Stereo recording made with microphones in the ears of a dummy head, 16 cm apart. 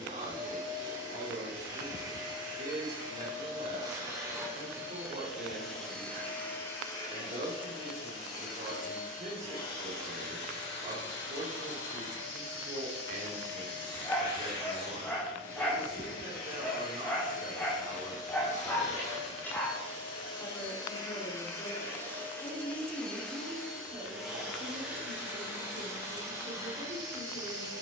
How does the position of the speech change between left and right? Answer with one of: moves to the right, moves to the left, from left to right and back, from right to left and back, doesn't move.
from right to left and back.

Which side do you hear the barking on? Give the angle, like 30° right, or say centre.
10° left.